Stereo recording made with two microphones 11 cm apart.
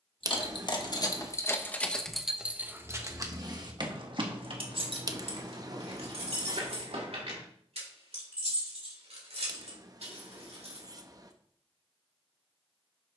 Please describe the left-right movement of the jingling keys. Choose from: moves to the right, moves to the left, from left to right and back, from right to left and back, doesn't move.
moves to the right.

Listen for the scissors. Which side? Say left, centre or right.
right.